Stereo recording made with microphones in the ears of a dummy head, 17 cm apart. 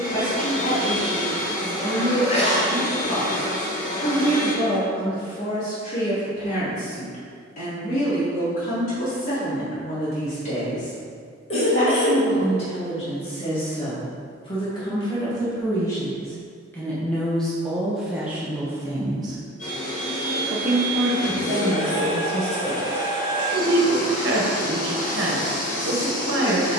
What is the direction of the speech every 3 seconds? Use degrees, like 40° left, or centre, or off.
40° left, 40° left, 40° left, 40° left, 30° left, 10° left, 20° right, 60° right, 60° right.